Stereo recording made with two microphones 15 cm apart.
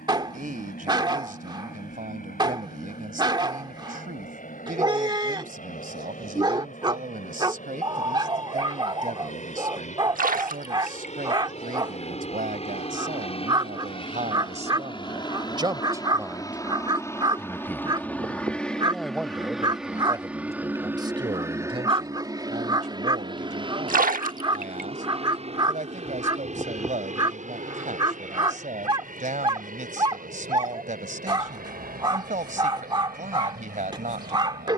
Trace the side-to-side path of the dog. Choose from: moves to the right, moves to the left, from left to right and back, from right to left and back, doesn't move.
doesn't move.